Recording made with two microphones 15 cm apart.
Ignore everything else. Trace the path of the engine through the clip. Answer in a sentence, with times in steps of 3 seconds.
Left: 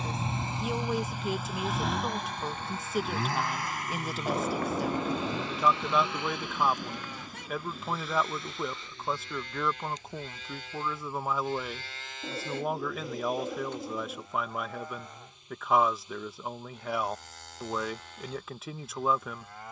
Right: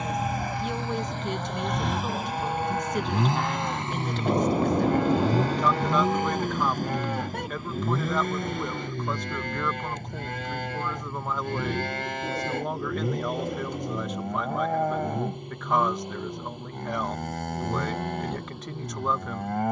In this clip you hear the engine in the centre from 0 s and on the right from 3 s.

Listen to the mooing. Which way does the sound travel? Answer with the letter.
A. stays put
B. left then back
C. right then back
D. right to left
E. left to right
A.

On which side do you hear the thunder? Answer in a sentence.
You can hear the thunder on the right.